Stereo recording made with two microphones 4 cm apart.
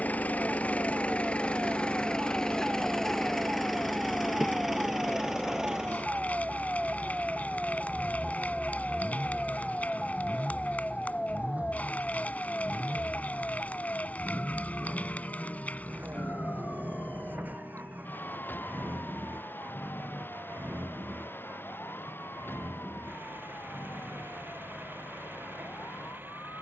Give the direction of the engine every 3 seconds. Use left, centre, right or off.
left, centre, right, right, right, right, right, right, right.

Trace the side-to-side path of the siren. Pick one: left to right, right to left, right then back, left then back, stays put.
right to left.